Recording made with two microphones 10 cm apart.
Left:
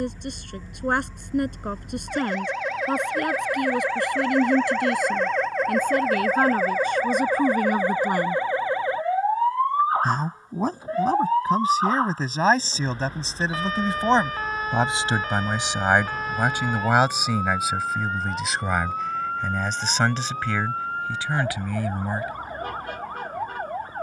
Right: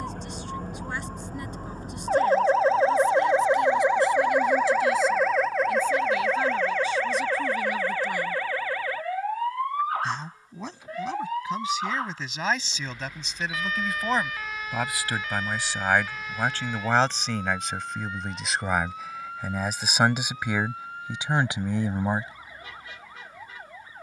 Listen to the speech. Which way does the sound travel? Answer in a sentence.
In this clip you hear the speech travel towards the right.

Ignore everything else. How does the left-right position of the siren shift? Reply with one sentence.
You can hear the siren travel towards the left.